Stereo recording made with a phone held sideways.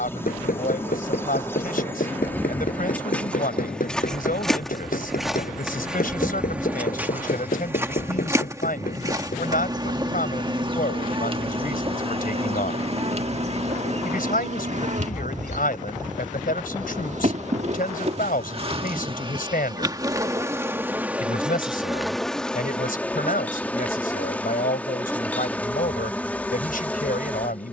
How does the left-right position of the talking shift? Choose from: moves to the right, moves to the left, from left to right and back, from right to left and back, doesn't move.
doesn't move.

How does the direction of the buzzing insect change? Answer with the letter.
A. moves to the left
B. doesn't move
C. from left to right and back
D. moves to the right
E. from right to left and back
C.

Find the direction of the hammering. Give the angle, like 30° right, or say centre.
80° left.